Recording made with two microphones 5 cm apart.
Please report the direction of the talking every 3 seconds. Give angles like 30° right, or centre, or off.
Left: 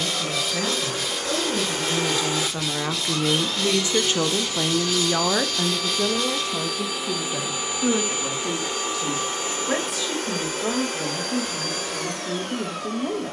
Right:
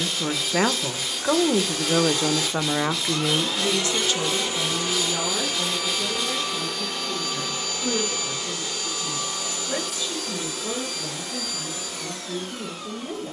40° right, 40° left, 70° left, 80° left, 80° left.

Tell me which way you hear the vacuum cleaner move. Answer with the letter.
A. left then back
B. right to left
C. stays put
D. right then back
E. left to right
D.